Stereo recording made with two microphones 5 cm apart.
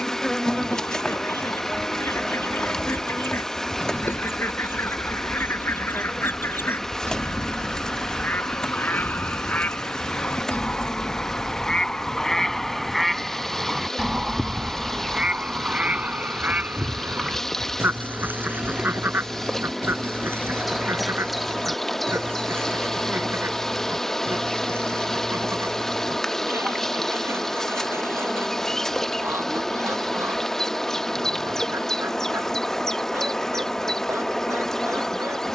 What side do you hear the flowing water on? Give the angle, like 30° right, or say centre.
10° left.